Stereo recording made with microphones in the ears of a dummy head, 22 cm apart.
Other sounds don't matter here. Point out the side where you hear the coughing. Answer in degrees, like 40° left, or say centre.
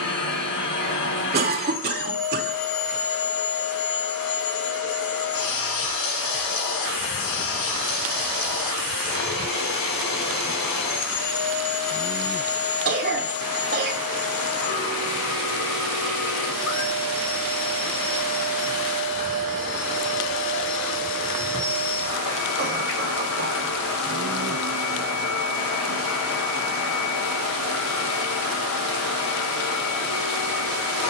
40° right.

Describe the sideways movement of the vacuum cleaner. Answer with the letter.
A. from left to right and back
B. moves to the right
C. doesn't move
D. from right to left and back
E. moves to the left
C.